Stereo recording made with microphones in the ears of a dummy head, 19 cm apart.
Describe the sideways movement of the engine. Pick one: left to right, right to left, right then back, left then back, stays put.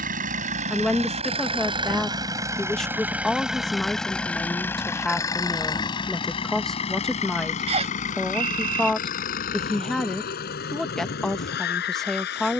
right to left.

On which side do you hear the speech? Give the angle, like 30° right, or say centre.
centre.